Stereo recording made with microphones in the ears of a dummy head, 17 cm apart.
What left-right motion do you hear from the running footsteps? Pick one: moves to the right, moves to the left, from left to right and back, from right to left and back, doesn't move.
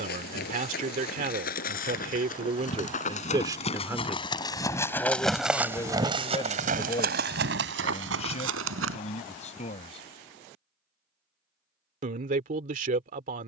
moves to the right.